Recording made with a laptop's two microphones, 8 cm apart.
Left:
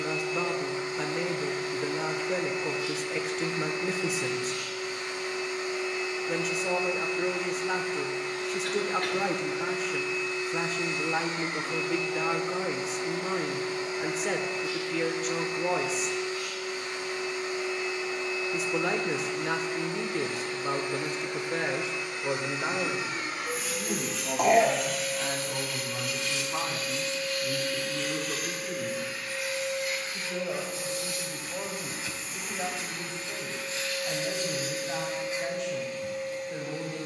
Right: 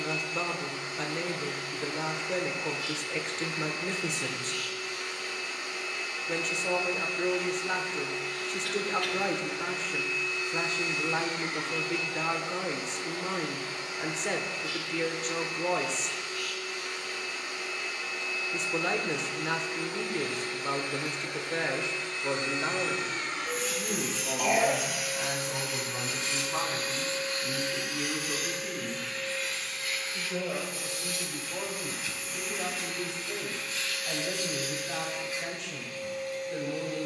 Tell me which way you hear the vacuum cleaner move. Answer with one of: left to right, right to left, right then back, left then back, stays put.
right then back.